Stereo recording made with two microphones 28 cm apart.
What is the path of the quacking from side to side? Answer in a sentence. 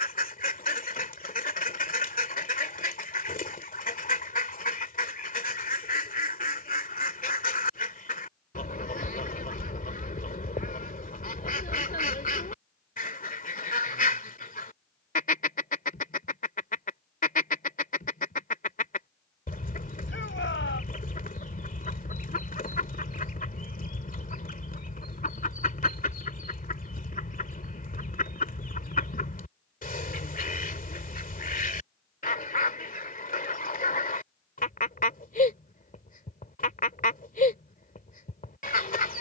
You can hear the quacking stay put.